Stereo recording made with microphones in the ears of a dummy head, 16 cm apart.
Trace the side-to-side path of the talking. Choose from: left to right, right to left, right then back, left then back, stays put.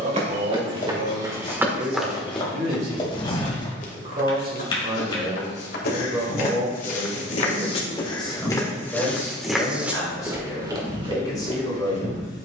right to left.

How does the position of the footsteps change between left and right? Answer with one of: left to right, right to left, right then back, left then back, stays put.
left then back.